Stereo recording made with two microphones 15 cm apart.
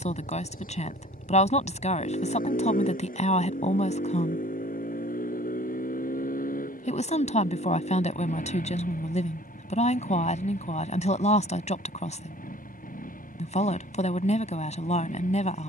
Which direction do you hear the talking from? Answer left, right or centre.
left.